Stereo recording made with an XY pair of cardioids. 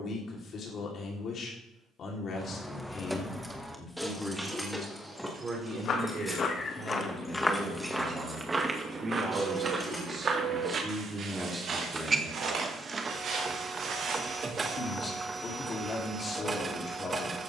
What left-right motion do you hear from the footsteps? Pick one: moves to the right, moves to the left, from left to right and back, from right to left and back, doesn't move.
moves to the right.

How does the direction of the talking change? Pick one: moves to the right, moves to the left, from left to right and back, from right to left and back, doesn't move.
from left to right and back.